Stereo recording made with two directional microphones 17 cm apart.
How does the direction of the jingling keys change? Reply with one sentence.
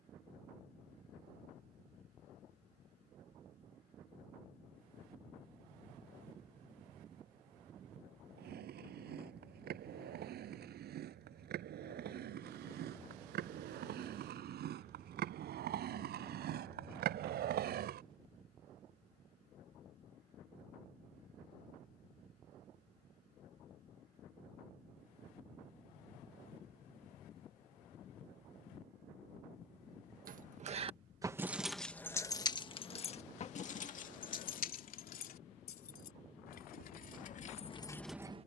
In this clip you hear the jingling keys go left and come back.